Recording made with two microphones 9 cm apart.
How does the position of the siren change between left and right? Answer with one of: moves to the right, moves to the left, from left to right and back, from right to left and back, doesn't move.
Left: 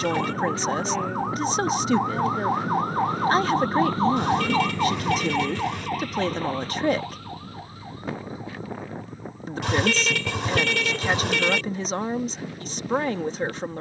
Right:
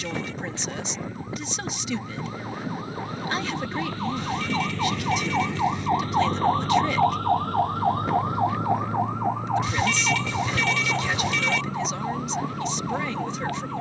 moves to the right.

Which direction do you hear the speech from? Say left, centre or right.
left.